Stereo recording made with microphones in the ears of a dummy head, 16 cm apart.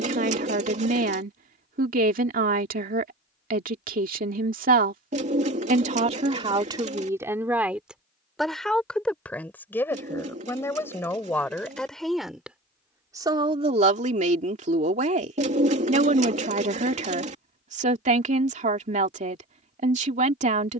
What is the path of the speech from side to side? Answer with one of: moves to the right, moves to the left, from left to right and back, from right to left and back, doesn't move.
from right to left and back.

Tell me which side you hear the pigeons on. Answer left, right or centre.
right.